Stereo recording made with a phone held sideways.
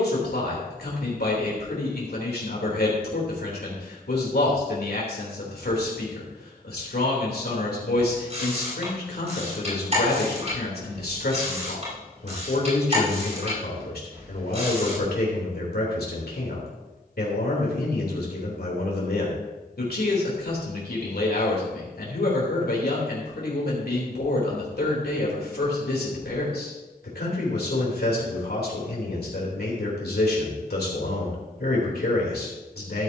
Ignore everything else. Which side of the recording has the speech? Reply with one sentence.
In this clip you hear the speech on the left.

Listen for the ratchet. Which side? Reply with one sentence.
In this clip you hear the ratchet on the right.